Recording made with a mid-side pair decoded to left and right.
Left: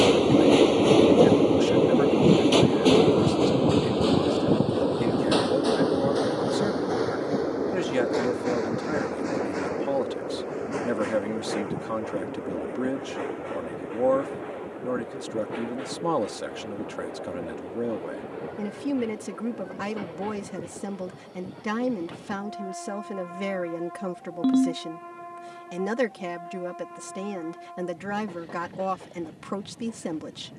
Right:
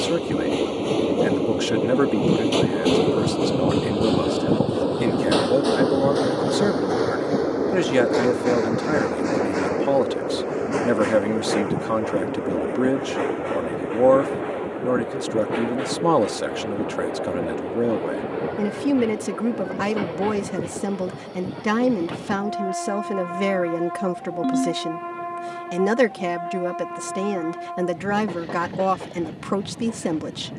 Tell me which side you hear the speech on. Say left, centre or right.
right.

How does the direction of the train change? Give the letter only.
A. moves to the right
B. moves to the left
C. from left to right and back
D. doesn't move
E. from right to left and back
A.